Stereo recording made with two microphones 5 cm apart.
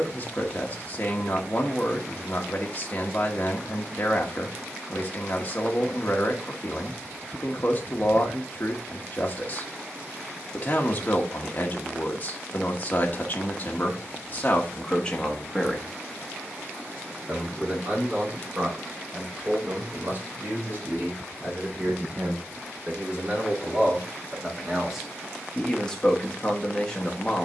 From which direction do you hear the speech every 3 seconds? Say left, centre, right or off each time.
left, left, left, left, left, centre, right, right, centre.